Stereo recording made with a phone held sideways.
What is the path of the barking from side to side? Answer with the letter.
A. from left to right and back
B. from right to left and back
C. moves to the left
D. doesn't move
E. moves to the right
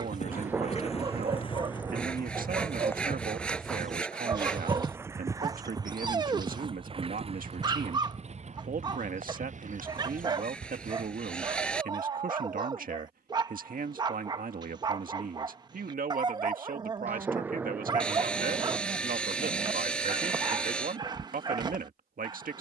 D.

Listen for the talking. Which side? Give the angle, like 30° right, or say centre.
60° right.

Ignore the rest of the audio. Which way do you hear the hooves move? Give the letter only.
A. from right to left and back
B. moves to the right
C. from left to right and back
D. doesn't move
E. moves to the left
B.